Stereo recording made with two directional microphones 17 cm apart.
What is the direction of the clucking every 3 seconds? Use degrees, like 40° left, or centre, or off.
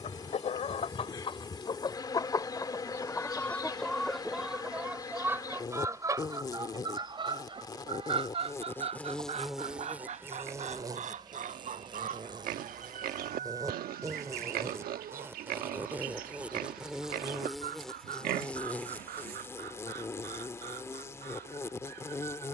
30° left, centre, 30° right, 50° right, 50° right, 60° right, 60° right, 60° right.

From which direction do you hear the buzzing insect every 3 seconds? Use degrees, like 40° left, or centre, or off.
20° left, 20° left, 20° left, 10° right, 20° right, 10° right, 10° left, 20° left.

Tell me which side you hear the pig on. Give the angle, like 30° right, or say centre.
60° right.